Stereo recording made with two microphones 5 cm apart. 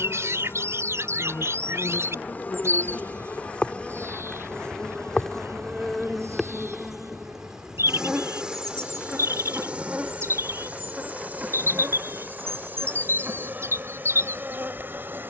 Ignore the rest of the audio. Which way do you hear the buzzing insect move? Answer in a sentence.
In this clip you hear the buzzing insect move from left to right.